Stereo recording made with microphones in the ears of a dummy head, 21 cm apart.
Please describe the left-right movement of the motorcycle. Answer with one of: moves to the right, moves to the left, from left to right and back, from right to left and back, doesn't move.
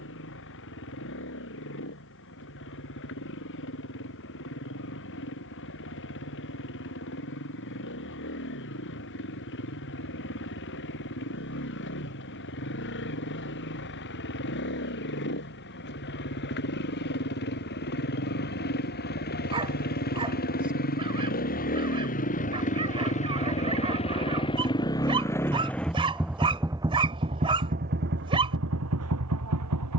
moves to the right.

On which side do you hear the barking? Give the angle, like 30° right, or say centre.
20° right.